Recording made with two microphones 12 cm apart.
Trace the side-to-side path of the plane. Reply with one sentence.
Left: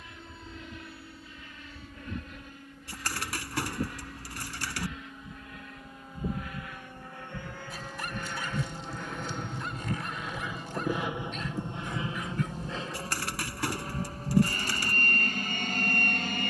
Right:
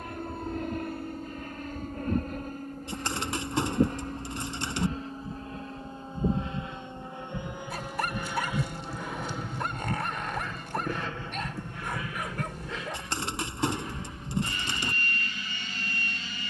You can hear the plane move from right to left.